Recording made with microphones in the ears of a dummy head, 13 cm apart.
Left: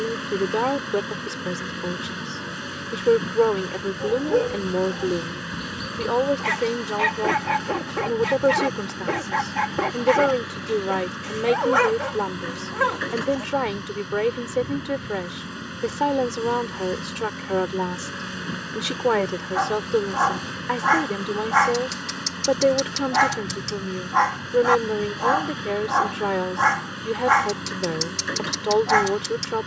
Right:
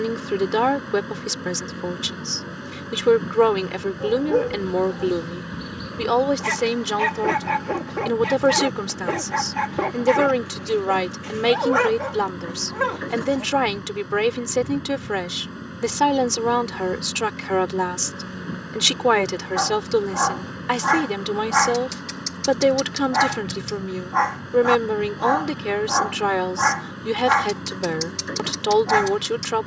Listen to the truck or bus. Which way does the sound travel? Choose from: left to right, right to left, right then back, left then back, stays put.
stays put.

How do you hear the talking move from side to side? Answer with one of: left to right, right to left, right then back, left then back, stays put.
stays put.